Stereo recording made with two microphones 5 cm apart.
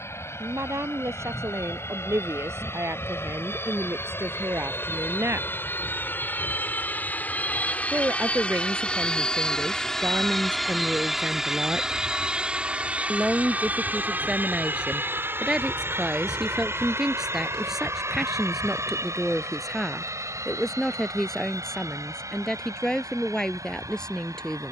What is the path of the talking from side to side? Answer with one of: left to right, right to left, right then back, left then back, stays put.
right to left.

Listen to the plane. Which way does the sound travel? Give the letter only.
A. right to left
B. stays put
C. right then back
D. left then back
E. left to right
E.